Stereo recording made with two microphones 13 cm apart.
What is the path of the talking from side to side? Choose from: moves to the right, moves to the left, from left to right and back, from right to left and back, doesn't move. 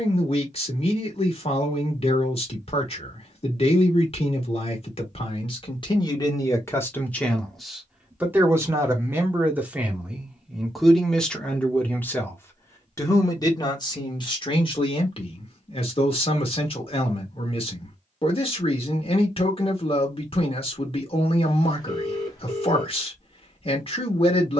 from left to right and back.